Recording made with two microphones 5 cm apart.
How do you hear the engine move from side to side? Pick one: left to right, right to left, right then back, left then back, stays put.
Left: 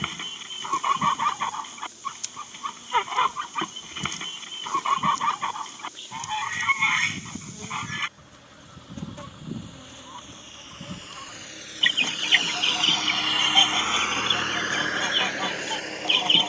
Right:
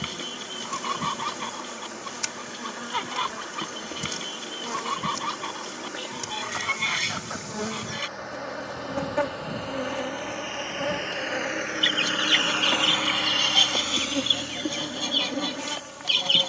right to left.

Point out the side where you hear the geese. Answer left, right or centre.
left.